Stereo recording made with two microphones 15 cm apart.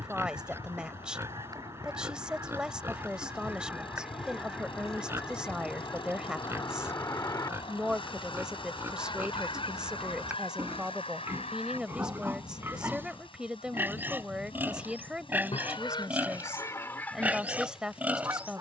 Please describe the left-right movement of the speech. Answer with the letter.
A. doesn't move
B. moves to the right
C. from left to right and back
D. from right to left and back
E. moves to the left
A.